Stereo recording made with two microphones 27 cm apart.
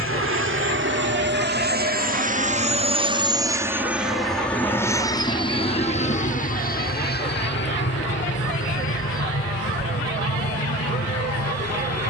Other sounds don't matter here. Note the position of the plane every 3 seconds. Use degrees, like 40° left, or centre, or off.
40° right, centre, 40° left, 50° left.